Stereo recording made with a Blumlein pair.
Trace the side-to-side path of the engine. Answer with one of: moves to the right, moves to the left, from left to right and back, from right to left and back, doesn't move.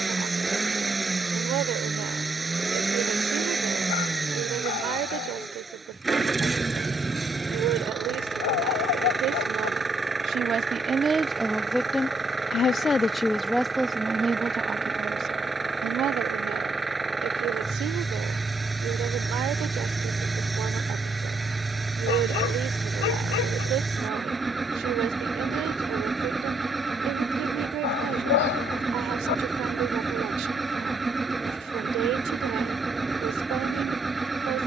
doesn't move.